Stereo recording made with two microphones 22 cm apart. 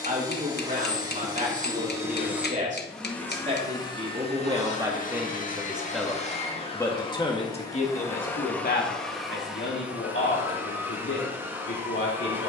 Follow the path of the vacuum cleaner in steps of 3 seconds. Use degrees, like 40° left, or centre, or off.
10° right, 30° left, 20° left, 10° right.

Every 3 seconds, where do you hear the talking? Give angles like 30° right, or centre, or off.
40° right, 20° right, 30° left, 60° left.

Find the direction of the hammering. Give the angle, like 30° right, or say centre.
50° left.